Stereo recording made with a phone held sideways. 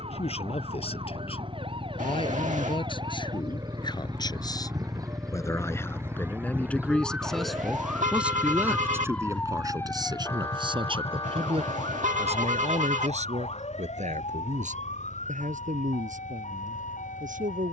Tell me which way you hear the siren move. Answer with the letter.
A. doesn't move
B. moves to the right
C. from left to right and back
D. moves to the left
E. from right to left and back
D.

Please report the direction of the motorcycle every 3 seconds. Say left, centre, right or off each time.
right, centre, left, left, left, left.